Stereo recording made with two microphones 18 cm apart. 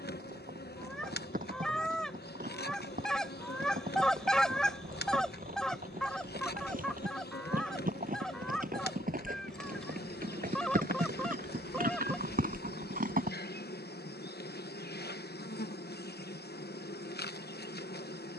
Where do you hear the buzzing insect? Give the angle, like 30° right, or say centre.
70° left.